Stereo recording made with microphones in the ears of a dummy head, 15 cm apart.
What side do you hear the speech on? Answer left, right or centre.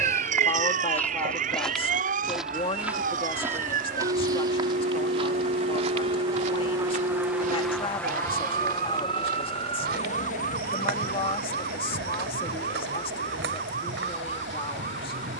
left.